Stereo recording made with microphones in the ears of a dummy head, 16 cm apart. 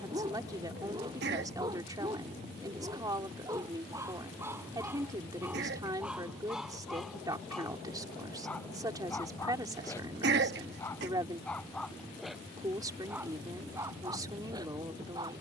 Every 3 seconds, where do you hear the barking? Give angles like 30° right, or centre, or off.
20° right, 10° right, centre, 10° left, 10° right.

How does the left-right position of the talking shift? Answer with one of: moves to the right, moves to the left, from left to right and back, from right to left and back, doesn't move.
doesn't move.